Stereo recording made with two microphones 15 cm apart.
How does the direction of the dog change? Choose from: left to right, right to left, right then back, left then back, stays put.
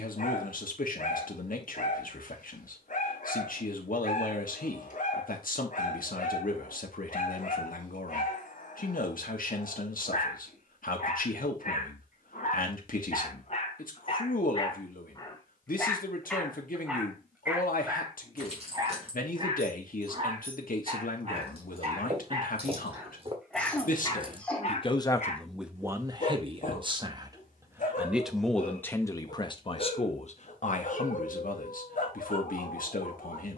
right then back.